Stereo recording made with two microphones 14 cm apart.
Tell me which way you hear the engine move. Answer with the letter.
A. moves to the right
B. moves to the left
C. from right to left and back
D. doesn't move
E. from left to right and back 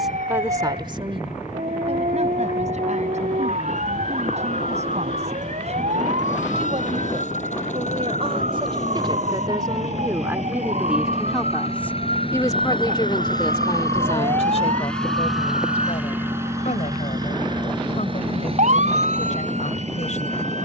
A.